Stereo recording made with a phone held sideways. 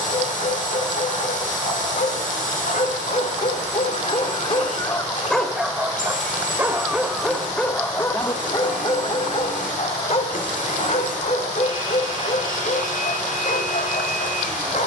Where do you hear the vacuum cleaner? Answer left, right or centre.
left.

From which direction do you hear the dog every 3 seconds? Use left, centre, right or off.
left, left, centre, left, left.